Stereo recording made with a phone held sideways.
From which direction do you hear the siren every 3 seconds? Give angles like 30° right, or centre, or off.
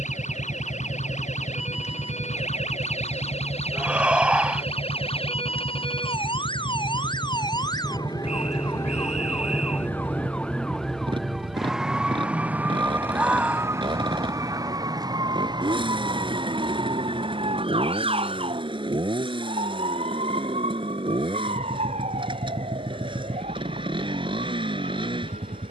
60° left, 50° left, 30° left, 10° left, 20° right, 40° right, 50° right, 50° right, 60° right.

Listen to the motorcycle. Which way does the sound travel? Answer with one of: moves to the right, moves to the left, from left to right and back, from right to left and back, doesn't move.
doesn't move.